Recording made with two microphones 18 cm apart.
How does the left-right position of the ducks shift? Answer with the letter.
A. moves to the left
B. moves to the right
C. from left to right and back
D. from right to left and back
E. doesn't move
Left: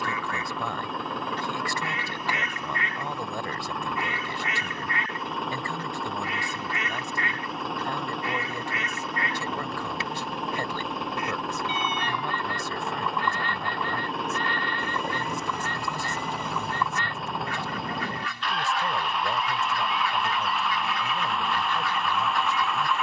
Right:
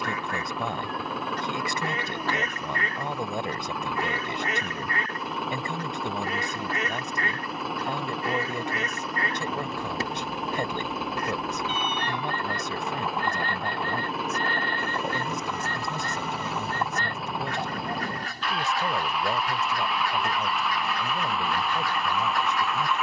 E.